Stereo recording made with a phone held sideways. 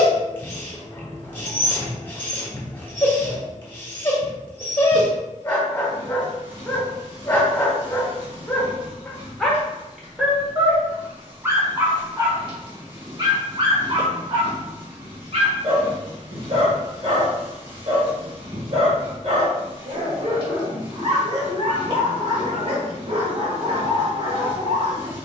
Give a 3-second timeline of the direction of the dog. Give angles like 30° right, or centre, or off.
20° left, 20° left, 20° left, 10° right, 40° right, 50° right, 50° right, 50° right, 50° right.